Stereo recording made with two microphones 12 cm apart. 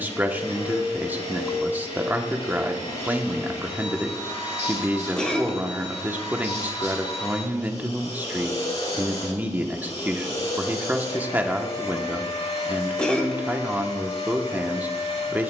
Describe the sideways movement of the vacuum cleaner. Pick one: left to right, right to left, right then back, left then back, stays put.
stays put.